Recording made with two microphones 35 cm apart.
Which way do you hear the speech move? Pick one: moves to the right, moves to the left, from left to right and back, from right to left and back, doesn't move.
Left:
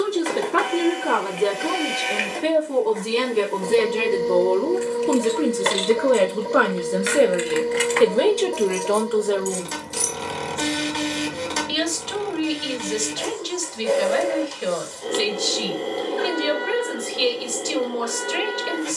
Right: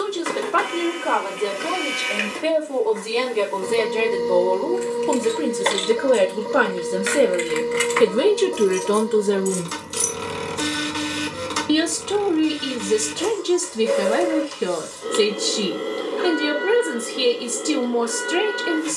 moves to the right.